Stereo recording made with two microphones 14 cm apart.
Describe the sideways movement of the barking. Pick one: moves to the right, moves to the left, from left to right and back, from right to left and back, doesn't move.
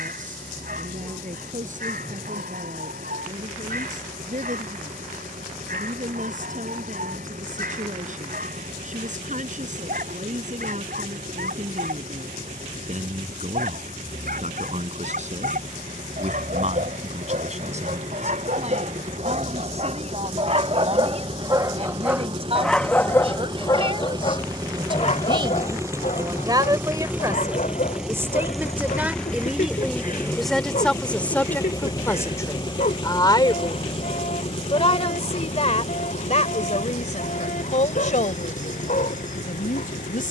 moves to the left.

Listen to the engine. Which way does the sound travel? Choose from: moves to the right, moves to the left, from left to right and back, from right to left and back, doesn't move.
moves to the left.